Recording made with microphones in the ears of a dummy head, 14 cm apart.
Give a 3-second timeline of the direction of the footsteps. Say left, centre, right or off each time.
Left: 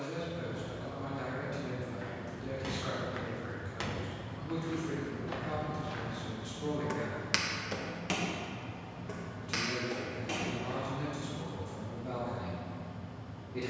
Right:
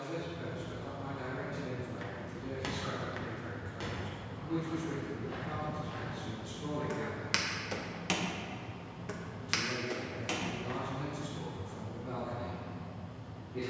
right, left, centre, right, off.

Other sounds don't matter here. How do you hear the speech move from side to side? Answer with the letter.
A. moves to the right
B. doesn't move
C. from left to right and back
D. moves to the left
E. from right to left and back
B.